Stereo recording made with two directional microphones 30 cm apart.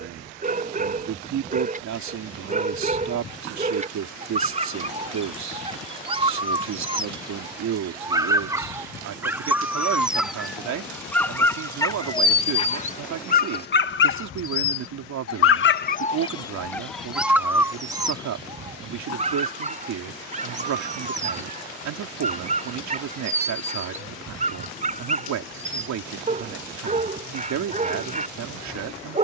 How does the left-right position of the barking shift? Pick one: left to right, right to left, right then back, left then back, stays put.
left then back.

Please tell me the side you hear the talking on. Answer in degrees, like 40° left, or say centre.
70° right.